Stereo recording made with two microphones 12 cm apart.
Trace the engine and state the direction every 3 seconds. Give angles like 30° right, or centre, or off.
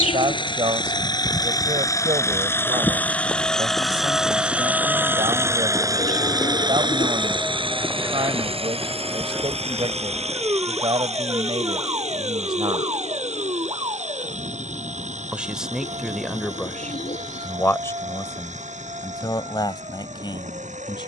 30° left, 10° right, 40° right, 60° right, 70° right, 70° right, 80° right.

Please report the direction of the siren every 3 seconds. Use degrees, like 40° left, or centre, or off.
30° left, 10° left, 10° right, 30° right, 40° right, 40° right, 50° right.